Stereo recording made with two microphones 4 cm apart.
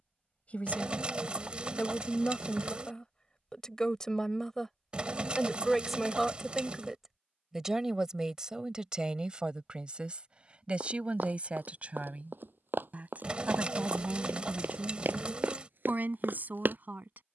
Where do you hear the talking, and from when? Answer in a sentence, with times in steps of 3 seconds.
You can hear the talking on the left from 0 s, in the centre from 3 s and on the right from 9 s.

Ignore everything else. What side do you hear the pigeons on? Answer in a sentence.
In this clip you hear the pigeons on the right.